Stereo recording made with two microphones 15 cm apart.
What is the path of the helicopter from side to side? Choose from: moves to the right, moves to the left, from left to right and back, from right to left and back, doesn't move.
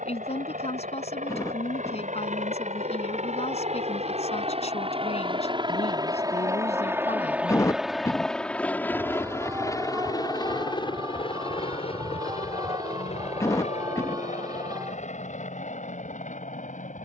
moves to the left.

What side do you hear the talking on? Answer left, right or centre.
left.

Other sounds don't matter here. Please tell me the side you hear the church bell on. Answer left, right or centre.
right.